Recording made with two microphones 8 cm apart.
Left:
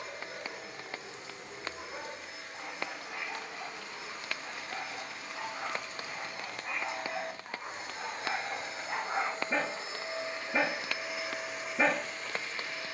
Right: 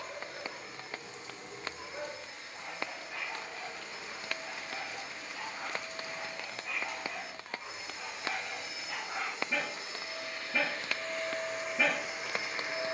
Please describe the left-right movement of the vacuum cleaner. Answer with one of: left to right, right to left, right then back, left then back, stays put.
left to right.